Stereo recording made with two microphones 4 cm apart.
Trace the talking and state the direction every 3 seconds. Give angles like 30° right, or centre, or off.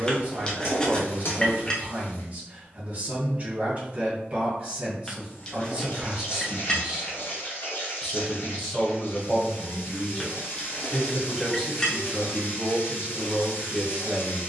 30° right, 30° right, 10° right, 10° left, 20° right.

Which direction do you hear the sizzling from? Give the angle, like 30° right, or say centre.
60° left.